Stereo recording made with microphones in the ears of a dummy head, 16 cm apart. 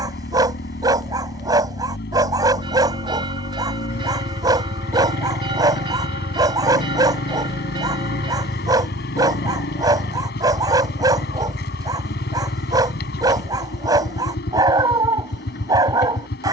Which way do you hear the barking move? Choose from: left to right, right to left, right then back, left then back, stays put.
stays put.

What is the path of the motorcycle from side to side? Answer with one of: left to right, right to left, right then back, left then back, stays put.
stays put.